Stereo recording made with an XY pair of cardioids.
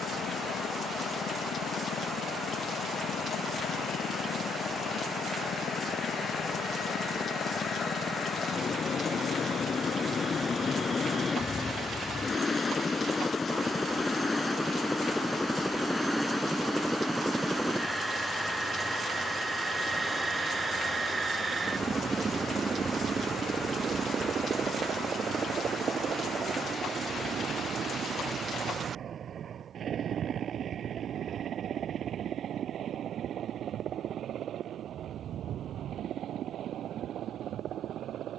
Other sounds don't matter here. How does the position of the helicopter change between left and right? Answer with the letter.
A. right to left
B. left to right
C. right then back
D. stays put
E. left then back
B.